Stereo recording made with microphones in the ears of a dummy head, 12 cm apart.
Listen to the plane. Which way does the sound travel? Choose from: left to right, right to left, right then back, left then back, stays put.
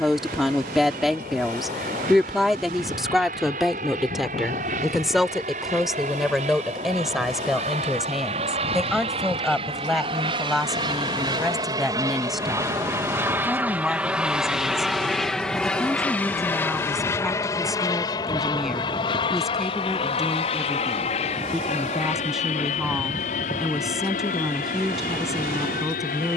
right to left.